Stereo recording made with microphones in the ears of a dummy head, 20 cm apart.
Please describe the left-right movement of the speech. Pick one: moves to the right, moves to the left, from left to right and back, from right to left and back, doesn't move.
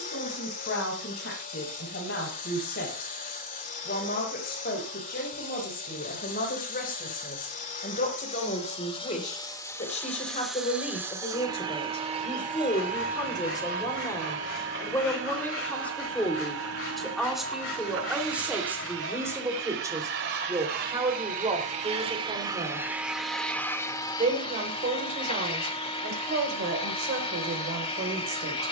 moves to the right.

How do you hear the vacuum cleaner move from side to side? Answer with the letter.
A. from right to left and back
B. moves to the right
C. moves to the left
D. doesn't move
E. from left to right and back
E.